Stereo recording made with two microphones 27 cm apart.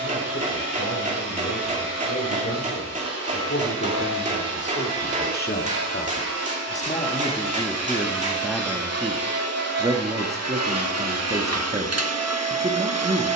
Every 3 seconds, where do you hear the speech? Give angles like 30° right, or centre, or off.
60° left, 40° left, 10° left, 20° right, 20° right.